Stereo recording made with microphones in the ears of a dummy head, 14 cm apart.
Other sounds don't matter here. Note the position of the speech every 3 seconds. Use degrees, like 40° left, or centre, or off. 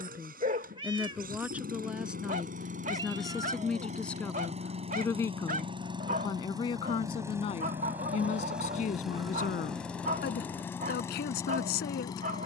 10° right, 10° left, 30° left, 60° left.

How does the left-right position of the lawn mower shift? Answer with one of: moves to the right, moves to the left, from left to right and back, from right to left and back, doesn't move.
moves to the left.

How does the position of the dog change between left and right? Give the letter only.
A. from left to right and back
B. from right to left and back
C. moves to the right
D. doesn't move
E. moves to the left
D.